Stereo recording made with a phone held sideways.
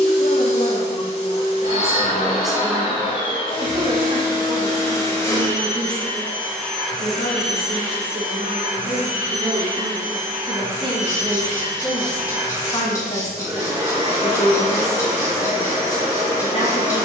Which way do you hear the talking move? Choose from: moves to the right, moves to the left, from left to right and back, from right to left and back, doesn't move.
from left to right and back.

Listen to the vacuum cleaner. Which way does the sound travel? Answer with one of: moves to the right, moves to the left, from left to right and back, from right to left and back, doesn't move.
moves to the right.